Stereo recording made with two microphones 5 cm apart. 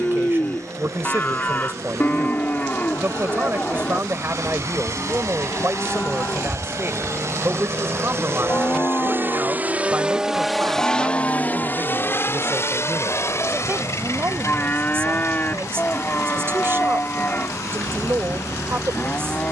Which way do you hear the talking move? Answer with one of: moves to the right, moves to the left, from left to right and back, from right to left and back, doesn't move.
doesn't move.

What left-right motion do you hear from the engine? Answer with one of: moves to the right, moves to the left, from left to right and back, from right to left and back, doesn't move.
moves to the left.